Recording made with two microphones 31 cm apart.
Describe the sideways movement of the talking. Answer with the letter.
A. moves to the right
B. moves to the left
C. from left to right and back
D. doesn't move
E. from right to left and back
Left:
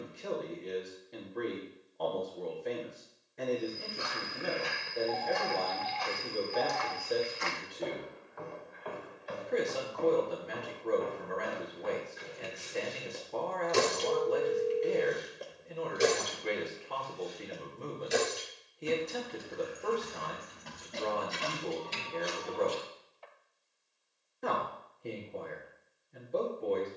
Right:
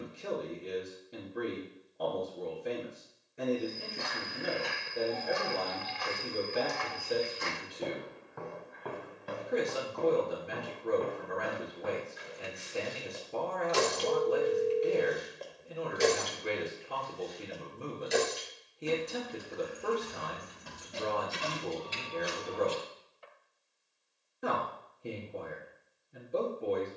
D.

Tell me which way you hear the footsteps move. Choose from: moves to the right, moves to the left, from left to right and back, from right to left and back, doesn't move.
moves to the right.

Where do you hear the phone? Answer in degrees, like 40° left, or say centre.
20° right.